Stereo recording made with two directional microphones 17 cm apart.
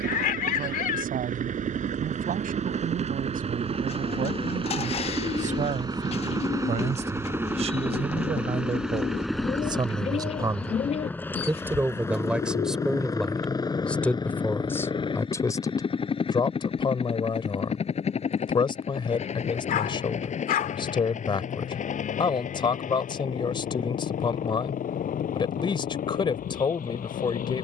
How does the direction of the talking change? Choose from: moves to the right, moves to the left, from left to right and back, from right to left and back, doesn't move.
moves to the left.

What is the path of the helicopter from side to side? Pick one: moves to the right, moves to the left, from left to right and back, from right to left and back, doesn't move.
moves to the left.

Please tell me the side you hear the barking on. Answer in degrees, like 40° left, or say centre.
60° left.